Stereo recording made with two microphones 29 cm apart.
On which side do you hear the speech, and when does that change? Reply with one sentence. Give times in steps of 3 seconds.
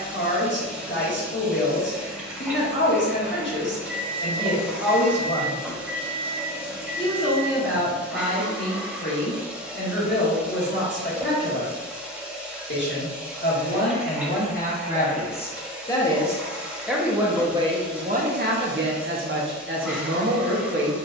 In this clip you hear the speech on the left from 0 s, in the centre from 15 s and on the right from 18 s.